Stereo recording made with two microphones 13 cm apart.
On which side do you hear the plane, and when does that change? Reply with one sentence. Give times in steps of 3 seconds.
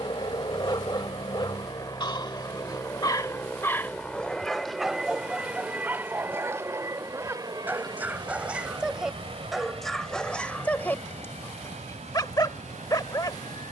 You can hear the plane on the left from 0 s, in the centre from 3 s and on the right from 6 s.